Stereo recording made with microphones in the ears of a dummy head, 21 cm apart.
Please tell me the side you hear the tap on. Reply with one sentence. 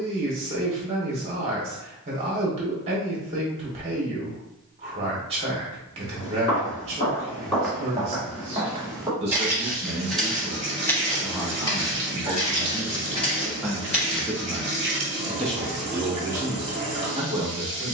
In this clip you hear the tap on the right.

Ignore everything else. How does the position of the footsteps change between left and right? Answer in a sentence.
You can hear the footsteps go right and come back.